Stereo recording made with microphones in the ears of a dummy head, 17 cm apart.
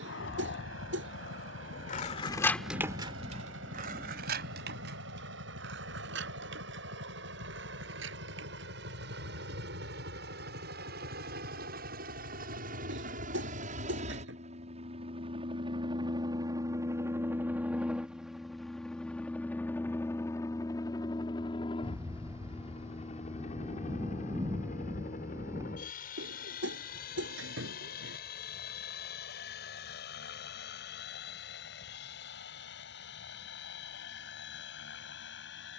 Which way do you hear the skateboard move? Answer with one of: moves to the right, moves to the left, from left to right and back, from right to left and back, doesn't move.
moves to the right.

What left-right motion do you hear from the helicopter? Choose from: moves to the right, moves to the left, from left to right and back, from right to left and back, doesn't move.
moves to the left.